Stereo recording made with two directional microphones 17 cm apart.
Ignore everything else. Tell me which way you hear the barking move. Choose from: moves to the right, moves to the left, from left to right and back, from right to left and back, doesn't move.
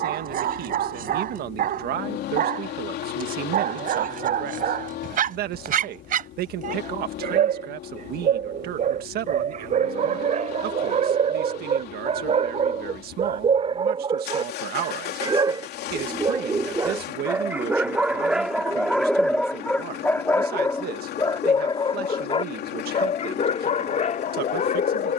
moves to the left.